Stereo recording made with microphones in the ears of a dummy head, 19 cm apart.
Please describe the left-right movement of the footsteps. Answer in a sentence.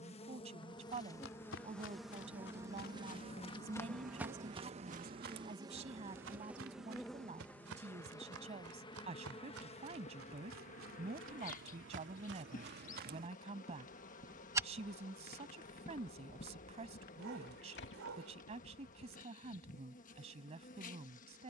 In this clip you hear the footsteps go right and come back.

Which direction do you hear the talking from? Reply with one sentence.
In this clip you hear the talking on the right.